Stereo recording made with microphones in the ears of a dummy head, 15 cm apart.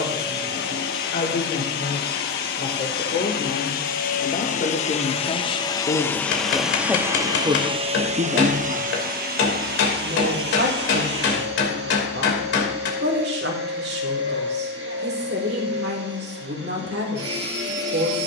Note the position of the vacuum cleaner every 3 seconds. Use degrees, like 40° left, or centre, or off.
60° left, 40° left, 20° right, 60° right, 70° right, 70° right.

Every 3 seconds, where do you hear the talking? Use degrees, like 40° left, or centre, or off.
60° left, 40° left, 20° right, 70° right, 70° right, 70° right.